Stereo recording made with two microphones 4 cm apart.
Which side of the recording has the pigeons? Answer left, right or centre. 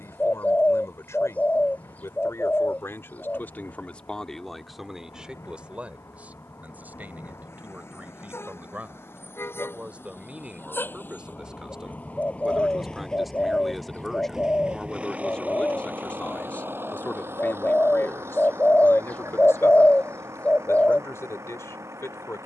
left.